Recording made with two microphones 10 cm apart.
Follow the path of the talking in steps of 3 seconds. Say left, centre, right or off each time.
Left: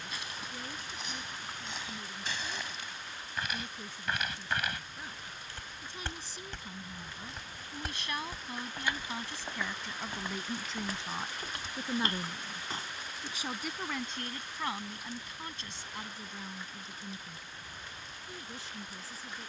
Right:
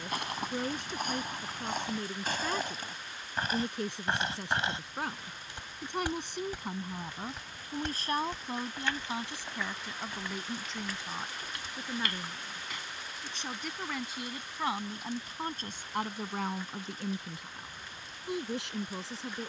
right, right, right, centre, centre, right, right.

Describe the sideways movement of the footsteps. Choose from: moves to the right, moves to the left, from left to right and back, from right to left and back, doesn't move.
moves to the left.